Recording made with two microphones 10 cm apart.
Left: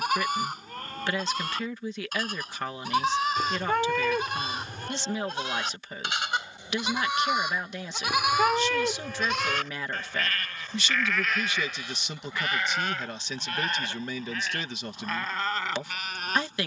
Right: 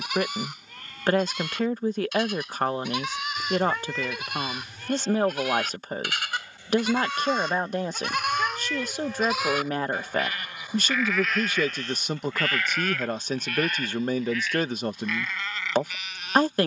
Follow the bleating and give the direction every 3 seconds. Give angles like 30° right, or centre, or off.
40° left, 30° left, 10° left, centre, 30° left, 40° left.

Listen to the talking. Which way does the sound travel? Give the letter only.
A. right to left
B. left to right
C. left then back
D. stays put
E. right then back
D.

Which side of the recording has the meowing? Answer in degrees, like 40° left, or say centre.
60° left.